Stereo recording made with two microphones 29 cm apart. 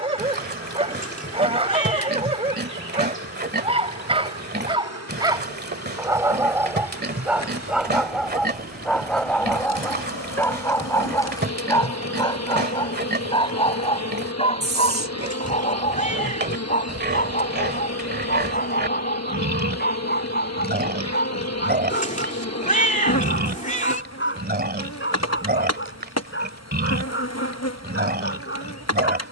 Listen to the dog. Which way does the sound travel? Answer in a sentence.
In this clip you hear the dog move to the left.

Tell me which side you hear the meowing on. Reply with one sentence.
You can hear the meowing on the left.